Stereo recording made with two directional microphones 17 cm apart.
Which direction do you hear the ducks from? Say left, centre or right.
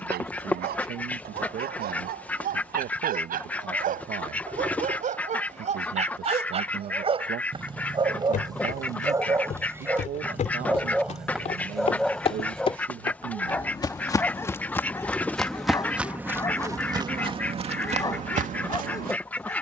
centre.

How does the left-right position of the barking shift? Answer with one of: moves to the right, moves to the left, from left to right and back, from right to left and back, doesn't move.
moves to the left.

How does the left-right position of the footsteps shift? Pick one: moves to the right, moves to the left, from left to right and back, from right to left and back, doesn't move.
moves to the right.